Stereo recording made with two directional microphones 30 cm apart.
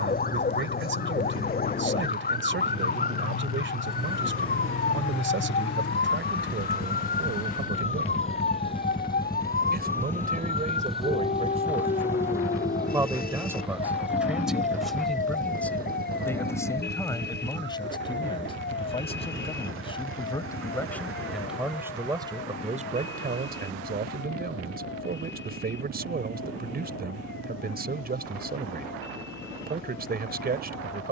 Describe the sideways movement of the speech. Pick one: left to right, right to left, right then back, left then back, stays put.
left then back.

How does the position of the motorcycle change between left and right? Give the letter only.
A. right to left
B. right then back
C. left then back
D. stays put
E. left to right
E.